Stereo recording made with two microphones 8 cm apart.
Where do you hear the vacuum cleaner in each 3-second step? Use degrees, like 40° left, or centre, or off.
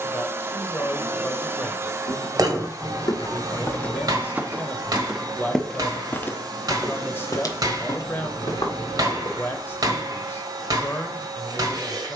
40° right, 60° right, 60° right, 60° right.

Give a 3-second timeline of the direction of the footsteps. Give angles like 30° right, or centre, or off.
70° left, 10° left, 50° left, 70° left.